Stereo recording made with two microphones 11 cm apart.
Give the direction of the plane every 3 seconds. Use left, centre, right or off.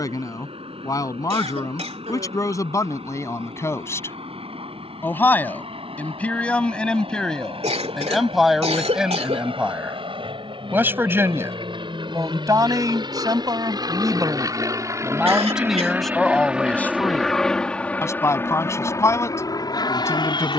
right, right, right, right, right, centre, left.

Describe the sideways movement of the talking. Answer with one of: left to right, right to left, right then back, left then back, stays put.
right then back.